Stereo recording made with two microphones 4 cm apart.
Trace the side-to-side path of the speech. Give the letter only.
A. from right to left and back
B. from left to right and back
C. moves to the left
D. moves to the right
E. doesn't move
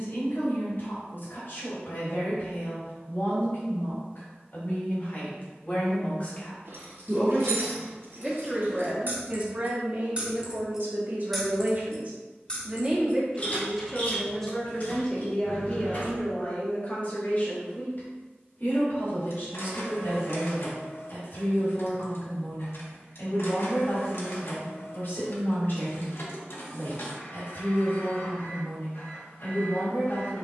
B.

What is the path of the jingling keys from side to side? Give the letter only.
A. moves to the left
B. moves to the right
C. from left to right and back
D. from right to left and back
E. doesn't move
A.